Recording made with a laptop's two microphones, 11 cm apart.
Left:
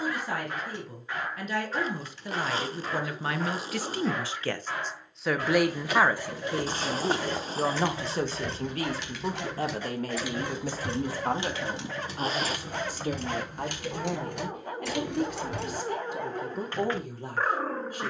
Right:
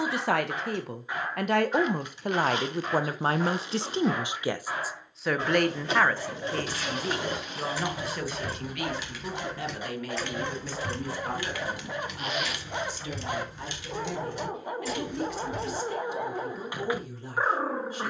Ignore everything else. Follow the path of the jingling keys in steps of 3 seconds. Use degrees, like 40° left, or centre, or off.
off, 30° right, 20° right, 10° left, 50° left, 70° left.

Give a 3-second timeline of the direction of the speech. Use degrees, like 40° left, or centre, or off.
60° right, 20° right, 20° left, 40° left, 50° left, 50° left.